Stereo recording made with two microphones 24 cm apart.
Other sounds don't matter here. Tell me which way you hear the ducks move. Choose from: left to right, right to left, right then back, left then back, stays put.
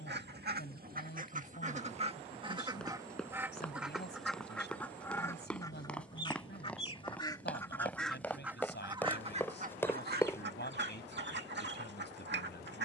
left then back.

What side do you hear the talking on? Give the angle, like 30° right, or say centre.
50° left.